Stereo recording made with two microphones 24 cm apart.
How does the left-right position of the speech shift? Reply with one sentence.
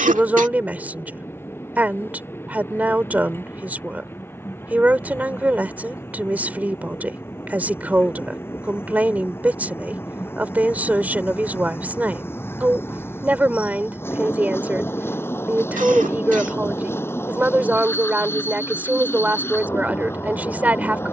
In this clip you hear the speech stay in one place.